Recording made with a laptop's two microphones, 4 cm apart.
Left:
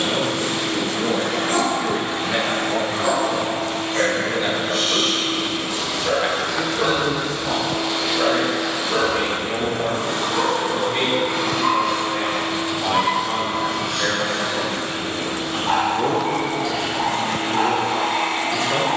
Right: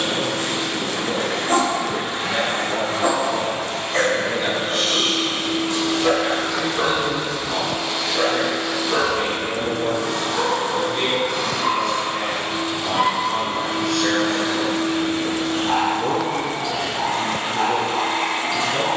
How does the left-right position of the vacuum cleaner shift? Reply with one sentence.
You can hear the vacuum cleaner move from right to left and back again.